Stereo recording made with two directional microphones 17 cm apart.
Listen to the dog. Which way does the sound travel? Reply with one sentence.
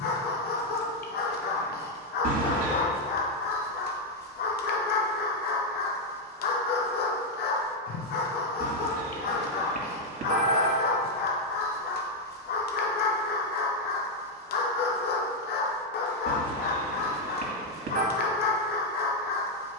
You can hear the dog stay put.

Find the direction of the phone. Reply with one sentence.
You can hear the phone on the right.